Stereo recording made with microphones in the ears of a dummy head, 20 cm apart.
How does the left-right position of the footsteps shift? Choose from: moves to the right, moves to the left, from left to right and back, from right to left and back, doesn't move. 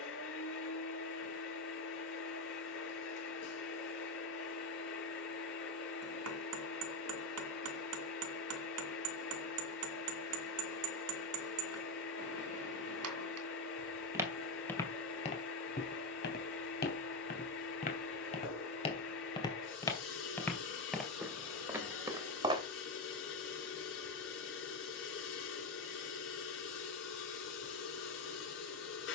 from right to left and back.